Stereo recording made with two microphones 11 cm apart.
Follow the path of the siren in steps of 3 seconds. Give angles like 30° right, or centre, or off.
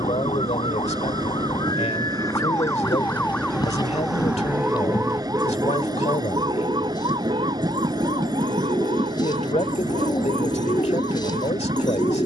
40° left, 10° right, 50° right, 60° right.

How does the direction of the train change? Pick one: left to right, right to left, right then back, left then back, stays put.
stays put.